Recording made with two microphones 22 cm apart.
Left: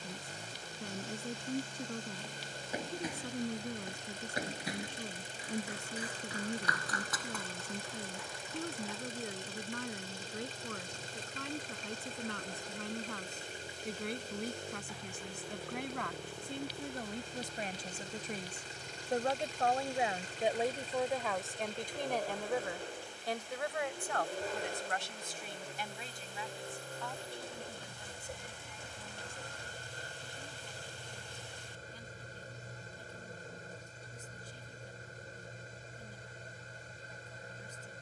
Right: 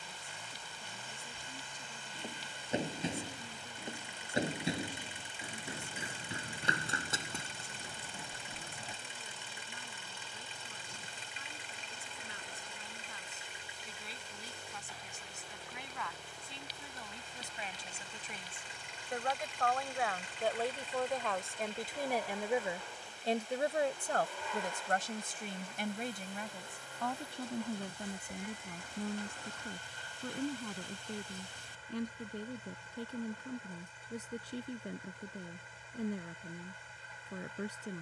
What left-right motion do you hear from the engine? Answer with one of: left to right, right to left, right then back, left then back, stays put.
stays put.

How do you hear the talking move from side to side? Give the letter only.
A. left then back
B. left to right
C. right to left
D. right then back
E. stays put
B.